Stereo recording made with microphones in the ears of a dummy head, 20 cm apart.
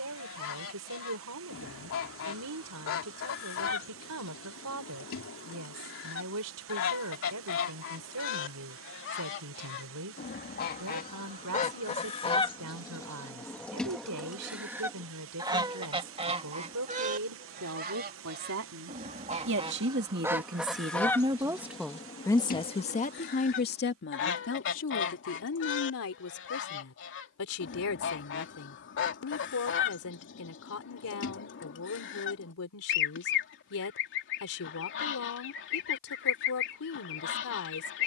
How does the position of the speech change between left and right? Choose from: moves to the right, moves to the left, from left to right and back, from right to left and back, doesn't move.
moves to the left.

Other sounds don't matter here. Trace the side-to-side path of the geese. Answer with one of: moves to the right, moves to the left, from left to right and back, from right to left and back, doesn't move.
from left to right and back.